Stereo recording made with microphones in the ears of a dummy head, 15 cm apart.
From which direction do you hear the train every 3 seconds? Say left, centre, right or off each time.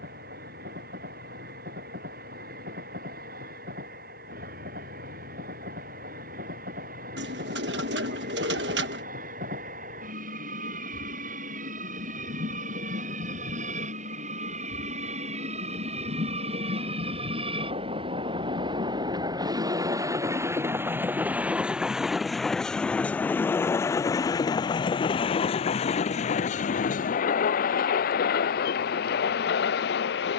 right, right, right, right, right, right, right, centre, left, left.